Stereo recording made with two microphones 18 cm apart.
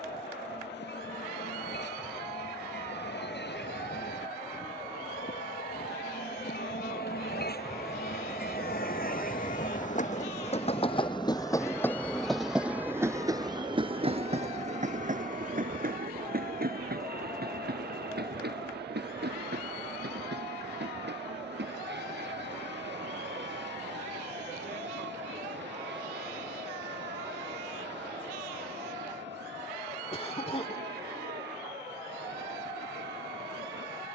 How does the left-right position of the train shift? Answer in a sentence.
You can hear the train travel towards the right.